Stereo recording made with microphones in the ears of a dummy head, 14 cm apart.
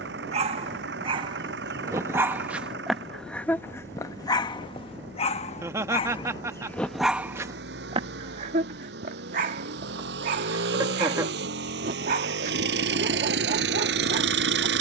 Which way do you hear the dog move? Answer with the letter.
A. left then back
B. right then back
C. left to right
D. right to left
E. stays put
A.